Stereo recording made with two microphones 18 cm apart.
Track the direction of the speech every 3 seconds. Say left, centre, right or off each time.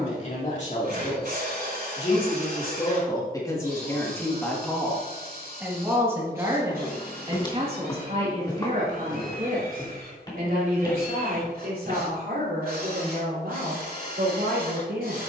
left, centre, right, right, right.